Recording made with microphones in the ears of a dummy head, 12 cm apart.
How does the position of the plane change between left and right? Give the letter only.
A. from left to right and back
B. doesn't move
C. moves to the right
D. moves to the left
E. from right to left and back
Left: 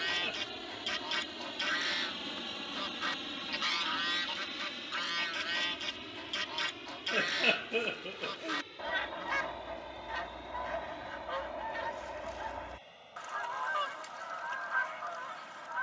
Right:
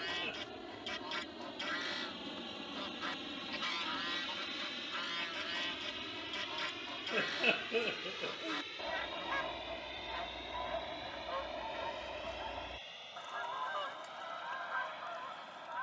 C.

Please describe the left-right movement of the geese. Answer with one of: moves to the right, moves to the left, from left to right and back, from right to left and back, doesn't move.
doesn't move.